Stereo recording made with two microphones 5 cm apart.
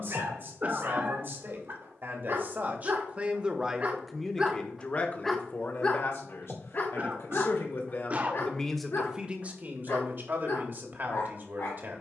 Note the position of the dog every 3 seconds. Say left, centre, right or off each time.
right, centre, left, left.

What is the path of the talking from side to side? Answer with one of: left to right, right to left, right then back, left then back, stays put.
left then back.